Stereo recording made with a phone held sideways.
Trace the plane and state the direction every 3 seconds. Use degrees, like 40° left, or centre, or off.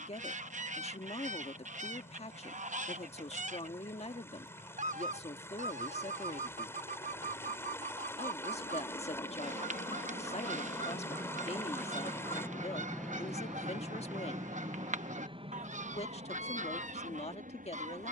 70° left, 70° left, 60° left, 40° left, centre, 40° right.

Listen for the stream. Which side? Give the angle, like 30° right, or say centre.
20° left.